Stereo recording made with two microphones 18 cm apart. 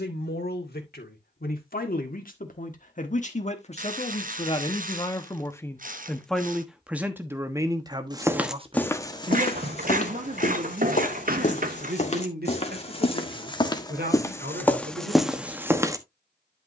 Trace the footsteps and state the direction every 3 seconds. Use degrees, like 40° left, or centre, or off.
off, off, centre, 40° left, 20° left, 10° right.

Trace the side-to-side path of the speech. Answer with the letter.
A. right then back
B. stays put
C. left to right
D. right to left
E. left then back
C.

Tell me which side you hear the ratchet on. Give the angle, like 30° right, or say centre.
50° right.